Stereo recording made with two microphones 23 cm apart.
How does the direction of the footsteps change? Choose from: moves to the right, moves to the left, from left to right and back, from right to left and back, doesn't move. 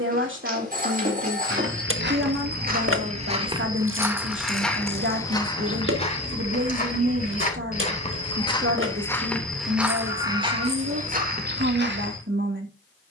from right to left and back.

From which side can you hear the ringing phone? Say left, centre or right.
right.